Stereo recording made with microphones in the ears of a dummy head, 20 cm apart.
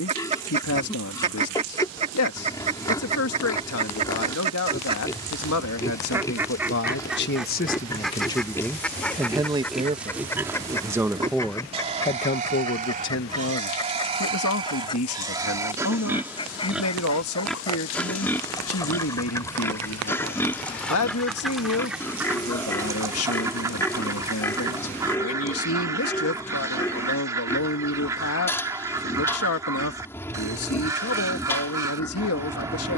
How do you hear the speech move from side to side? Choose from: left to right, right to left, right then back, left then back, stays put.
right then back.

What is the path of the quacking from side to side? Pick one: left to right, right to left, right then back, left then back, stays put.
left then back.